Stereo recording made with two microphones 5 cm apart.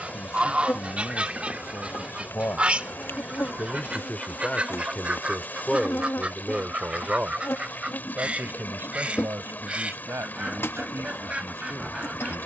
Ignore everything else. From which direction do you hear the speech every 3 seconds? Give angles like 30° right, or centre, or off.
60° left, 20° left, 30° right, 60° right.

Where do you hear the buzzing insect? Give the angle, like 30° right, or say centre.
50° left.